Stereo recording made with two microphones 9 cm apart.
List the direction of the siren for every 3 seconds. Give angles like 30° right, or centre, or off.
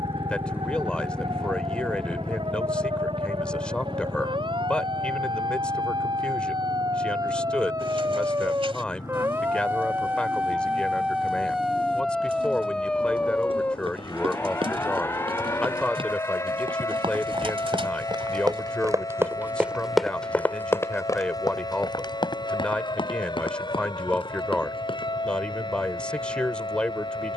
70° right, 60° right, 40° right, 10° right, 10° left, 30° left, 40° left, 50° left, 50° left.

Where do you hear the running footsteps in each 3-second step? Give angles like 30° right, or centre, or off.
off, off, off, off, 80° right, 70° right, 10° right, 60° left, 70° left.